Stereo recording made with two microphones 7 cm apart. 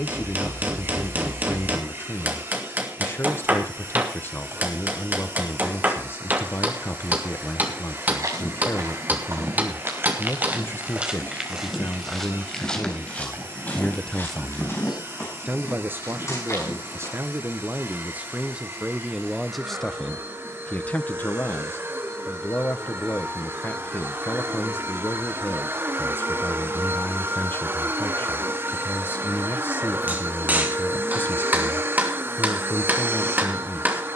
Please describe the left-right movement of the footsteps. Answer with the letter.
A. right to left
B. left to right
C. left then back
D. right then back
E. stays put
A.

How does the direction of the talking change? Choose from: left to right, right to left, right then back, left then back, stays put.
right then back.